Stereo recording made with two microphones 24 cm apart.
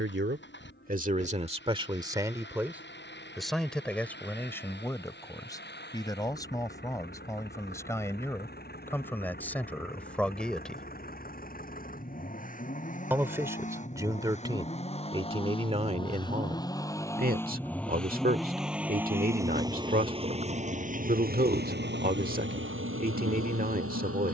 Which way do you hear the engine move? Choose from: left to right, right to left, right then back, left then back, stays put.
left to right.